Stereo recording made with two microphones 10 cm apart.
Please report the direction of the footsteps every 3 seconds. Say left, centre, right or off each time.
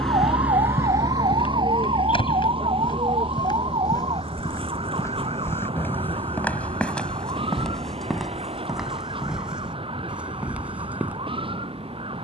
left, left, centre, centre.